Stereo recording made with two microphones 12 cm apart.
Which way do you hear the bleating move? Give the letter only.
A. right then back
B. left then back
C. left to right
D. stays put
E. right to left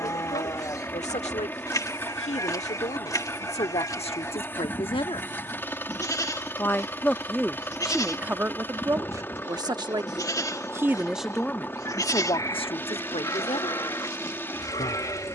D.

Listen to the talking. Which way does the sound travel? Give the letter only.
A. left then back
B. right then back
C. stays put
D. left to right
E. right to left
B.